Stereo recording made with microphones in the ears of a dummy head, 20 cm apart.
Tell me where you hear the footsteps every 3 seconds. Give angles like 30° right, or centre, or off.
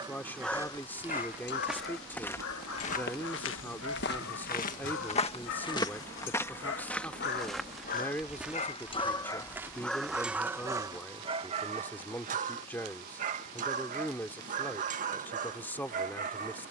centre, 40° left, centre, 10° right, off, off.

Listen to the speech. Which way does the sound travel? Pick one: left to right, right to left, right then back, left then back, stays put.
stays put.